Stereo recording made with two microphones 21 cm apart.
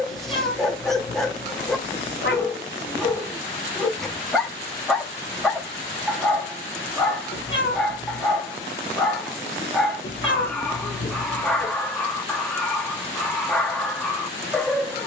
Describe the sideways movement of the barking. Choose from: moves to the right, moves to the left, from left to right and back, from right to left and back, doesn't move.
doesn't move.